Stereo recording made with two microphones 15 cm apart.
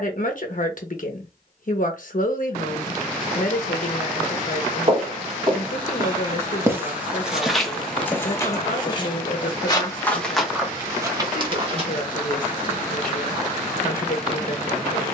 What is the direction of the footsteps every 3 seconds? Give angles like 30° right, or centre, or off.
off, 30° right, centre, 10° right, off.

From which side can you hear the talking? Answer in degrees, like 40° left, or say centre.
60° left.